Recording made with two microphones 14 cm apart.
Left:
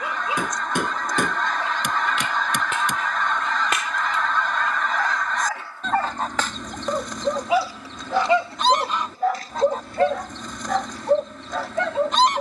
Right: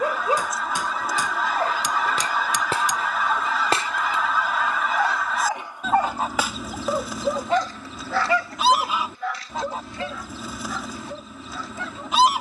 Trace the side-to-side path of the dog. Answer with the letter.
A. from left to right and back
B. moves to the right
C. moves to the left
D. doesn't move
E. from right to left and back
C.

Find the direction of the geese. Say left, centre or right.
centre.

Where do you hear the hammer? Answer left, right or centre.
left.